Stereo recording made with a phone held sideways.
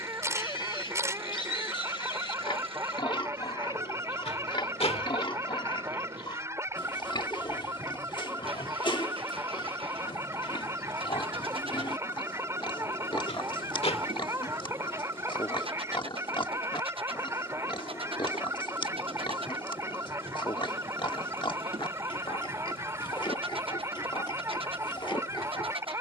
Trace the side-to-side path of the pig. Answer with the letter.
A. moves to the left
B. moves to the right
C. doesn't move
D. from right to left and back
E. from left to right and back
C.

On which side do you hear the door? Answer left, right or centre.
left.